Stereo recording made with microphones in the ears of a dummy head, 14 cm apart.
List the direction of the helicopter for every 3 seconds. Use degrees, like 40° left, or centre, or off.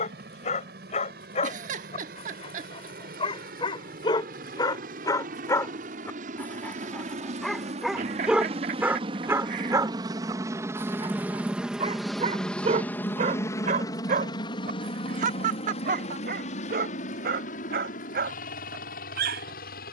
70° right, 60° right, 50° right, 20° right, 20° left, 50° left, 60° left.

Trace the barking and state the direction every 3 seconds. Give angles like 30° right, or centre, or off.
40° left, 30° left, centre, 30° right, 50° right, 60° right, 70° right.